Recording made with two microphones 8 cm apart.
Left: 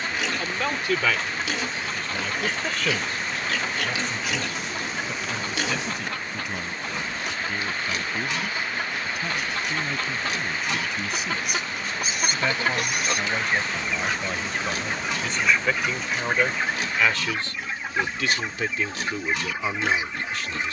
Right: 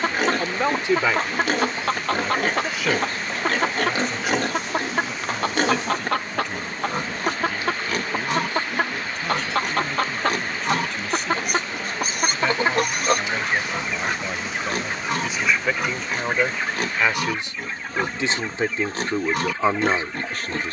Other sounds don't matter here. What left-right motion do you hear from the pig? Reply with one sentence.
You can hear the pig stay in one place.